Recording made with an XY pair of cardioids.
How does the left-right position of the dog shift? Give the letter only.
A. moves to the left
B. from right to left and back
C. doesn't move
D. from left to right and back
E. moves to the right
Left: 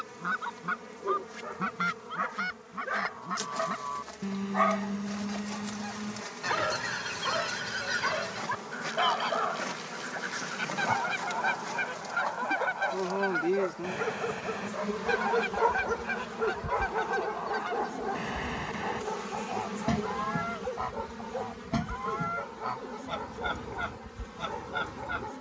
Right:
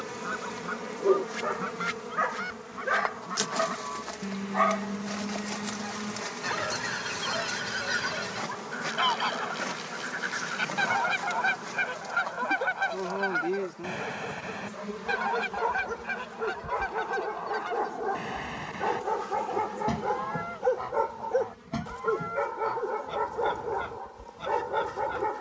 B.